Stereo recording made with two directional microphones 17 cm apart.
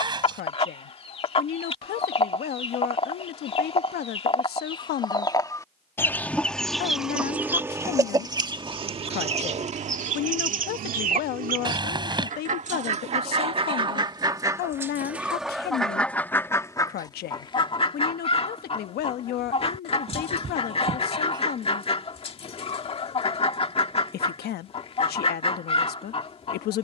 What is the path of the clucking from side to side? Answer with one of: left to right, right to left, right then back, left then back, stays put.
right then back.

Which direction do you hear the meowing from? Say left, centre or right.
right.